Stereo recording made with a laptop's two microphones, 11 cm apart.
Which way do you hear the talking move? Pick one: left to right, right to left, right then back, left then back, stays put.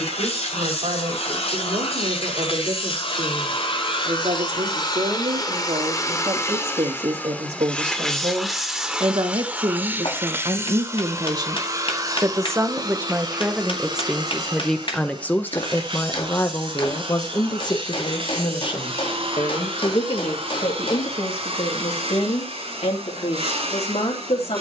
right to left.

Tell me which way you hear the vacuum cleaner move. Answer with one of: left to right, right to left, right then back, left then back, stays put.
left to right.